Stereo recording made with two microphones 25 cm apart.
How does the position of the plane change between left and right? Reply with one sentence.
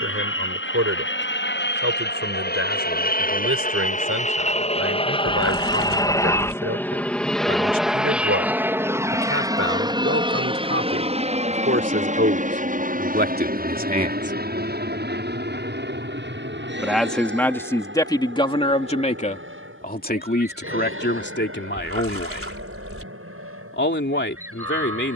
In this clip you hear the plane move from left to right.